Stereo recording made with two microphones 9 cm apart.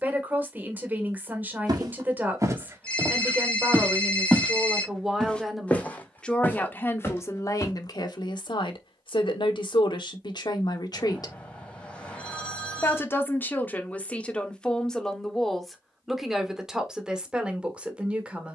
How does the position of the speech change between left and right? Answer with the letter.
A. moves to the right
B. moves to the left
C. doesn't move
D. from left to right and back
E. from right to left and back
E.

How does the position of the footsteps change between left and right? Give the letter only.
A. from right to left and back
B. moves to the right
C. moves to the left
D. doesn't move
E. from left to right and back
C.